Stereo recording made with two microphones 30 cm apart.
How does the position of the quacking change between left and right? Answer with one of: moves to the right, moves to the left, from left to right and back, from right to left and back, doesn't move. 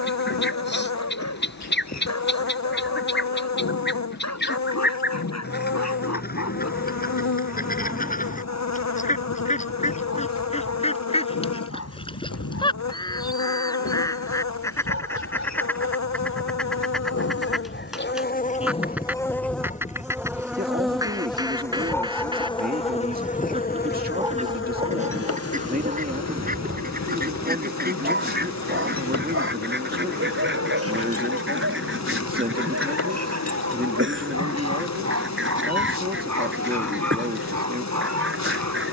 moves to the right.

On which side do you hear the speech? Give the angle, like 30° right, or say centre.
30° right.